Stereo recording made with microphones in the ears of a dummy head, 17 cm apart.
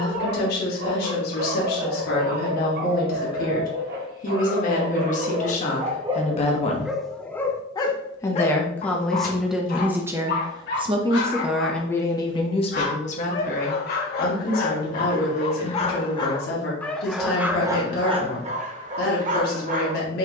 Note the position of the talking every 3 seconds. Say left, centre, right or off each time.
left, left, left, centre, left, left, left.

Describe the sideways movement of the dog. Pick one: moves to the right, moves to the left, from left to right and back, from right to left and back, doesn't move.
from right to left and back.